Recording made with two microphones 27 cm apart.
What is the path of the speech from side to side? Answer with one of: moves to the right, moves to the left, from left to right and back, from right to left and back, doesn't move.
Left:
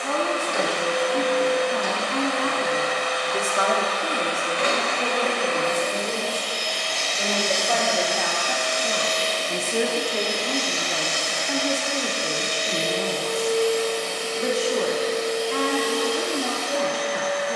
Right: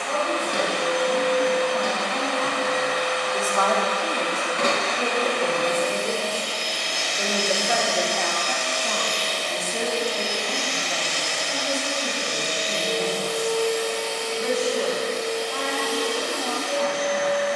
from left to right and back.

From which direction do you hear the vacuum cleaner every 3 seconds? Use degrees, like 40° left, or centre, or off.
60° right, 50° right, 10° right, 40° left, 60° left, 70° left.